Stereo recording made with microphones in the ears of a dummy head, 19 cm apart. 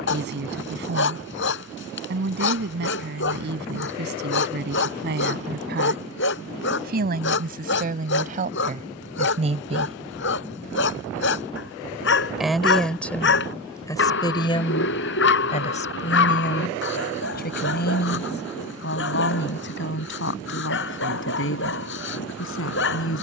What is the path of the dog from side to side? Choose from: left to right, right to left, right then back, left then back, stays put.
stays put.